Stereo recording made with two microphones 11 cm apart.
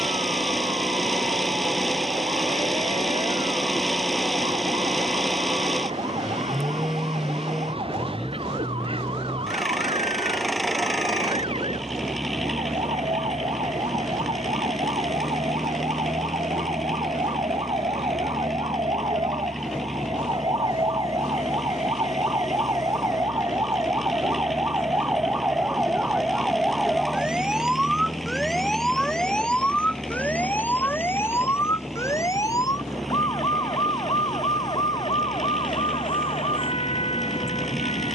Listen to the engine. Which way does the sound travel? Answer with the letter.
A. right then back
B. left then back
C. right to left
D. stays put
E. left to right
D.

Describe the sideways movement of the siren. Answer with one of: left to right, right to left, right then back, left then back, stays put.
right to left.